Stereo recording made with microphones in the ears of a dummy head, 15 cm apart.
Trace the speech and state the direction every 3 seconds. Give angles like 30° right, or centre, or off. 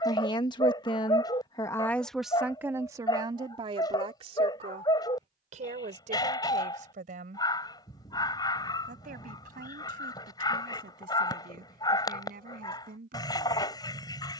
10° left, 30° right, 50° right, 50° right, 50° right.